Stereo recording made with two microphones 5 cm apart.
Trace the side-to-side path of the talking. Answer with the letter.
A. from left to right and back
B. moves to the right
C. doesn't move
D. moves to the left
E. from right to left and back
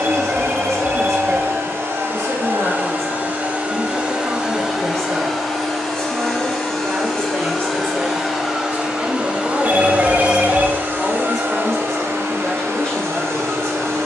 D.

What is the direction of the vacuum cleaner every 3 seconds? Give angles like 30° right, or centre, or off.
50° right, 10° right, centre, 30° right, 60° right.